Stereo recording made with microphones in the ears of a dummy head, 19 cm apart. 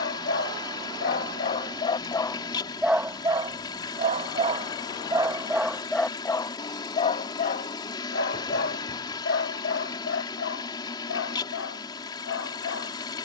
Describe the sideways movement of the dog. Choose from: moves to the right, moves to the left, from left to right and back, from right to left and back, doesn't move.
from left to right and back.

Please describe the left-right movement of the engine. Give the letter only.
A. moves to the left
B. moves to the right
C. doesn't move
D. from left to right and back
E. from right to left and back
C.